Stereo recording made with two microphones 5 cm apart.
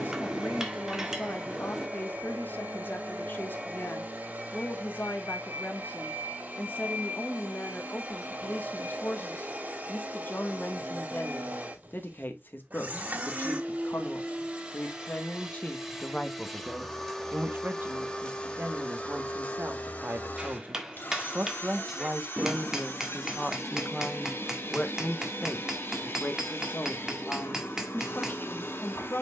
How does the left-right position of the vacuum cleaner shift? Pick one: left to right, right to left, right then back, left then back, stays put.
right to left.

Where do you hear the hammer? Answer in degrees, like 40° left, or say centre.
10° right.